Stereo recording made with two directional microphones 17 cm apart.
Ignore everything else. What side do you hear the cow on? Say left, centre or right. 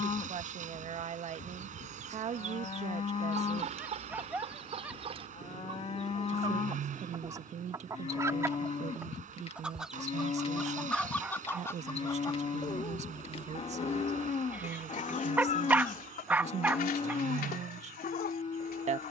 left.